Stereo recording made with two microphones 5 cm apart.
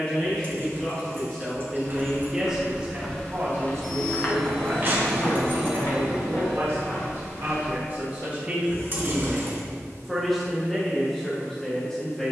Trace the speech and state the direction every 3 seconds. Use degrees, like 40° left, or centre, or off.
10° left, 60° right, 40° right, centre.